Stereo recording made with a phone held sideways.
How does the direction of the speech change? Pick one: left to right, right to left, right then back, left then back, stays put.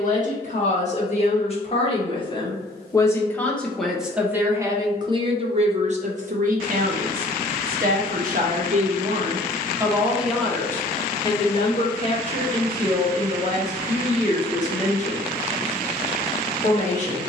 right then back.